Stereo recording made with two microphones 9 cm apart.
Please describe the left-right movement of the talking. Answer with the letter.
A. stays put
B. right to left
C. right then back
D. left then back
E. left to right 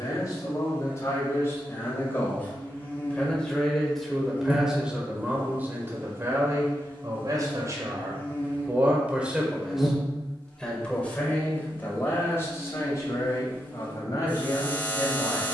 C.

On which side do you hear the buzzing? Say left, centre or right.
left.